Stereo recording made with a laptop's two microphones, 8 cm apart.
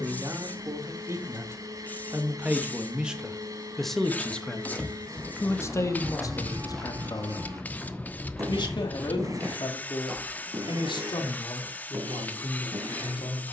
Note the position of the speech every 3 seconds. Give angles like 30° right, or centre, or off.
30° right, 10° left, 50° left, 70° left, 80° left.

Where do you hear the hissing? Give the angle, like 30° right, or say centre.
20° left.